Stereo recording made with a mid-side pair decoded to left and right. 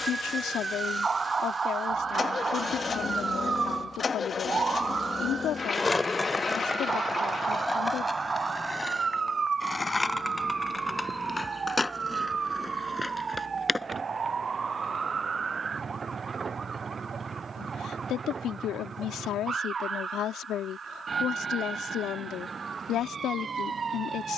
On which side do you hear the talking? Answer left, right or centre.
left.